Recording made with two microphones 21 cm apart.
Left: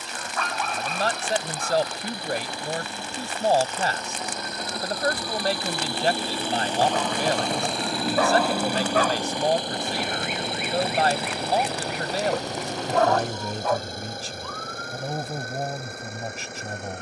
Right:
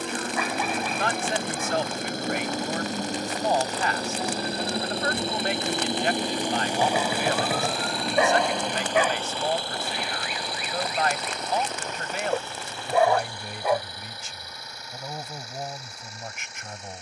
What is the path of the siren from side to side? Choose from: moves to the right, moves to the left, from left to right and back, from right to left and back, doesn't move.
moves to the left.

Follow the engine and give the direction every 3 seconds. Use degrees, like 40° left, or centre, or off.
50° right, 30° right, centre, 20° left, 40° left, 50° left.